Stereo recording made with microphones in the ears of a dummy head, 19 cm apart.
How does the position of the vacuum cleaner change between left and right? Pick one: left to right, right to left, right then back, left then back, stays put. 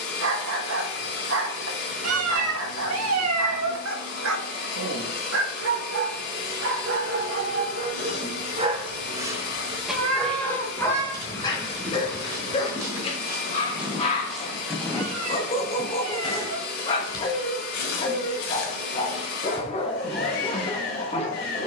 stays put.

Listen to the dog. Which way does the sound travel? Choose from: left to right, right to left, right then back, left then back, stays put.
right to left.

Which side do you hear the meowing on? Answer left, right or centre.
right.